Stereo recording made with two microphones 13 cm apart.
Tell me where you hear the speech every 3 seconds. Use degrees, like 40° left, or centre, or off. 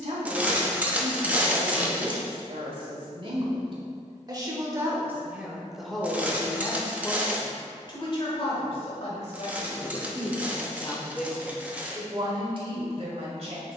60° right, 20° right, 30° left, 30° left, 50° right.